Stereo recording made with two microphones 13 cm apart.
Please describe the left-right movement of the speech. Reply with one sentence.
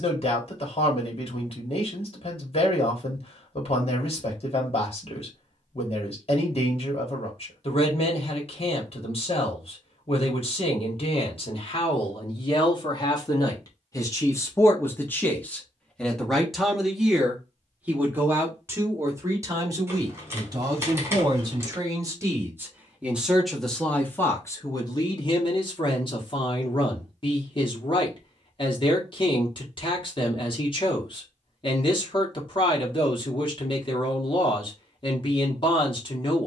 You can hear the speech move from left to right and back again.